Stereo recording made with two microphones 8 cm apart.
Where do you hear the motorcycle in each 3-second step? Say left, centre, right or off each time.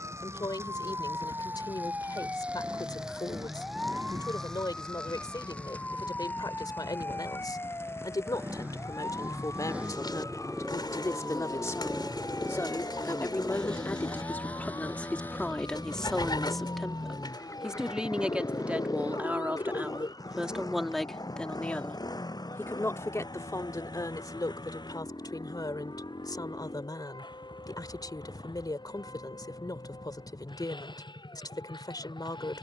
right, right, right, centre, centre, left, left, left, left, left, left.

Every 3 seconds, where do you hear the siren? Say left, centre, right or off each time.
right, centre, left, left, left, left, left, left, left, left, left.